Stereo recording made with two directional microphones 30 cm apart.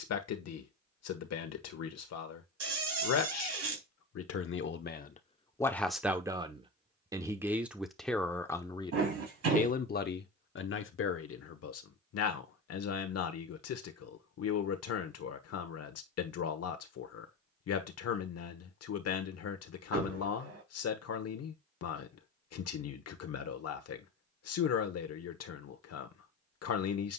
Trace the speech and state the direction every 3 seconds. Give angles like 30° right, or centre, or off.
60° left, 40° left, centre, 40° left, 60° left, 60° left, 60° left, 60° left, 60° left.